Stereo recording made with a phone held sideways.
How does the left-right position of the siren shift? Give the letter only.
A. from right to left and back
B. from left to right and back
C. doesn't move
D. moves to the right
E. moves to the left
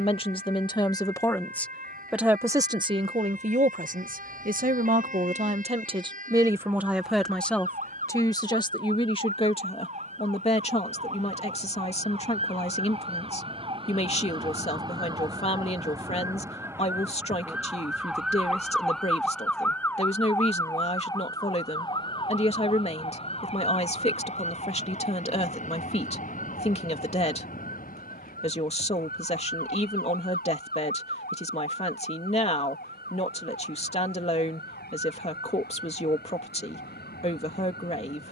E.